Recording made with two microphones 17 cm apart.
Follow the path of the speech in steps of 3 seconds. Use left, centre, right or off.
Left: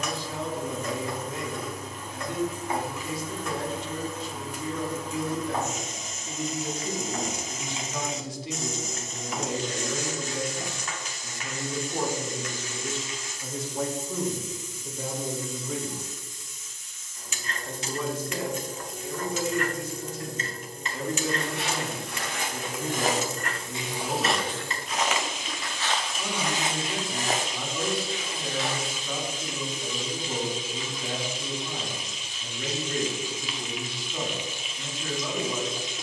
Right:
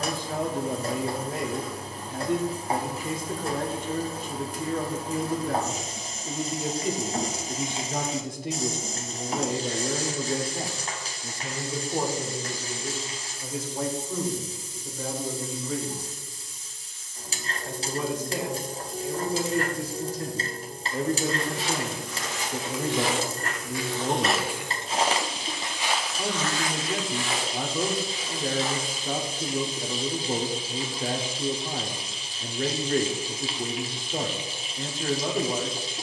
right, right, right, right, centre, centre, right, right, right, right, right, right.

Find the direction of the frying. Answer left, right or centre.
right.